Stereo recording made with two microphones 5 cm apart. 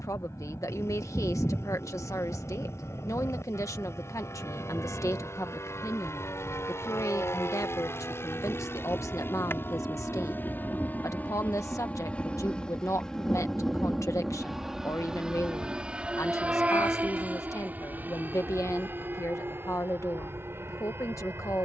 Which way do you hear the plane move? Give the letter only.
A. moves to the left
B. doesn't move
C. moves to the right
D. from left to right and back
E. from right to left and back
C.